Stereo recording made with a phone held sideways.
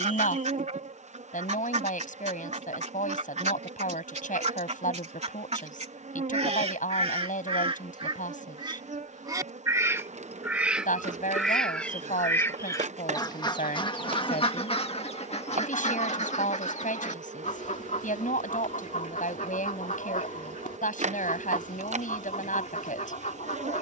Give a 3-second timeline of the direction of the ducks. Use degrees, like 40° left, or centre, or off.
60° right, 60° right, 40° right, 10° right, 30° left, 60° left, 70° left, 70° left.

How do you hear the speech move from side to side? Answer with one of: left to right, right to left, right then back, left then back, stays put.
stays put.